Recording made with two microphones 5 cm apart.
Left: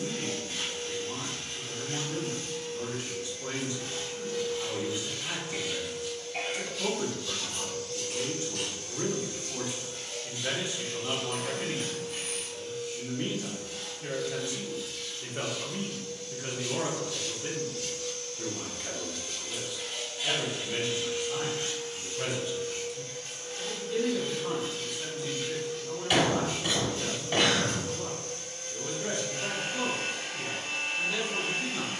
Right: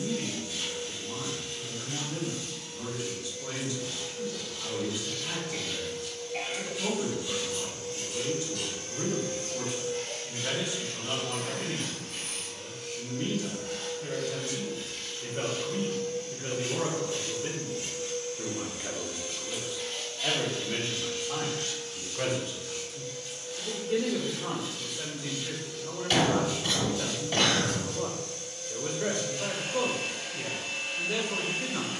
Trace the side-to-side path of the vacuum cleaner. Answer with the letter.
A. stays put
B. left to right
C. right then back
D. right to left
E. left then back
C.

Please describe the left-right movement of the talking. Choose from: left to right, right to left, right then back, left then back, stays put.
left to right.